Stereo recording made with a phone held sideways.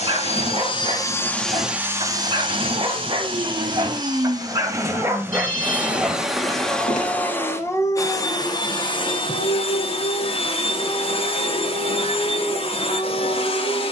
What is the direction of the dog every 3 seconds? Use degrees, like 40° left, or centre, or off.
40° right, 20° right, 20° left, 50° left, 70° left.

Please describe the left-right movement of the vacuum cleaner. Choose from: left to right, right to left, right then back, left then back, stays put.
right then back.